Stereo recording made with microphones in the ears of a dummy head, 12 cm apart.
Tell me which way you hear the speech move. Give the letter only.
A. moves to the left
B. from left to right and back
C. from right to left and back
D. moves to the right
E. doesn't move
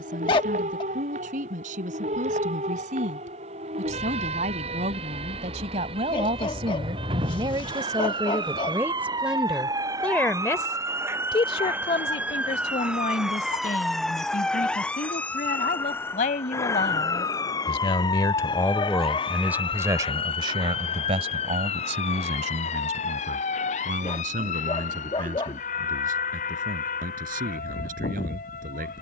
C.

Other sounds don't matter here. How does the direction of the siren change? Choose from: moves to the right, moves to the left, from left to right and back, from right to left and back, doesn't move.
moves to the left.